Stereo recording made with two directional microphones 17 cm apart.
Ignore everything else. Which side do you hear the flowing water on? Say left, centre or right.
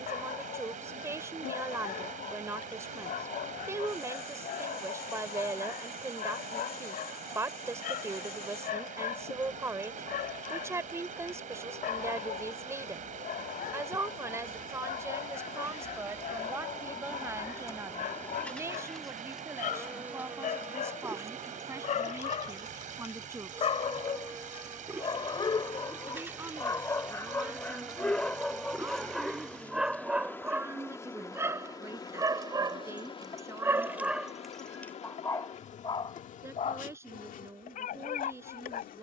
right.